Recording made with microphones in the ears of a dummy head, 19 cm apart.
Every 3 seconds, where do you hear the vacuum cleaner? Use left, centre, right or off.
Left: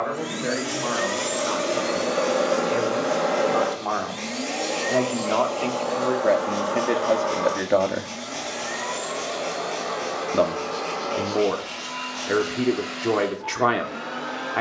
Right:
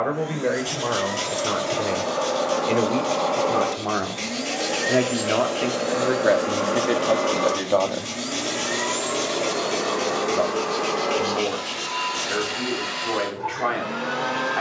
left, centre, right, right, right.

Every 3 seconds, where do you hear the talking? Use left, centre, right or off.
right, right, centre, left, left.